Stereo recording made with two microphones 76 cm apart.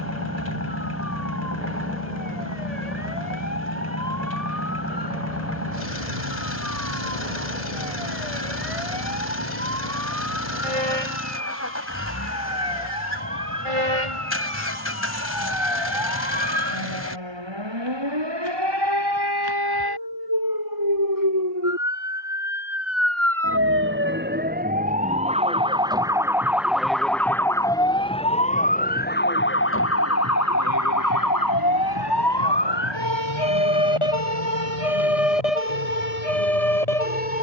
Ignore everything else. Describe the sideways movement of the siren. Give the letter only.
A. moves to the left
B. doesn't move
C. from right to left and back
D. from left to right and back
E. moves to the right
A.